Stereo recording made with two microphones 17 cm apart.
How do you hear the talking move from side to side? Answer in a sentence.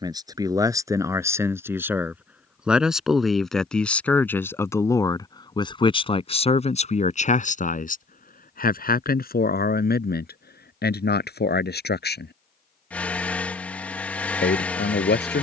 You can hear the talking move to the left.